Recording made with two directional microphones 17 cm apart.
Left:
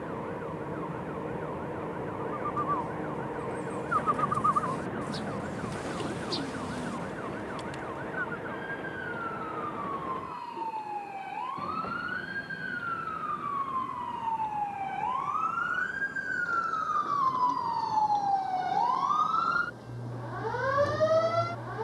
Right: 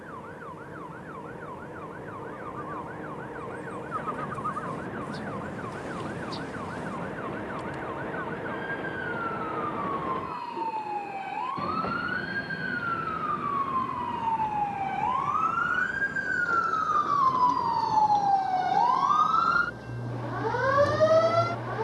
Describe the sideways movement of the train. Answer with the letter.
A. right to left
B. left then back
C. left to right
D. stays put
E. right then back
C.